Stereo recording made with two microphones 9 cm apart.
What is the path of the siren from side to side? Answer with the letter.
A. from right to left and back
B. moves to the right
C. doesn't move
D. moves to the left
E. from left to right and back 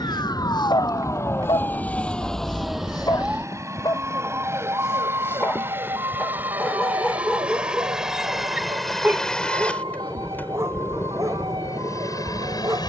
B.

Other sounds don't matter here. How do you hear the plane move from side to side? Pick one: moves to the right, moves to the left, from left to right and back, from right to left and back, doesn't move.
moves to the left.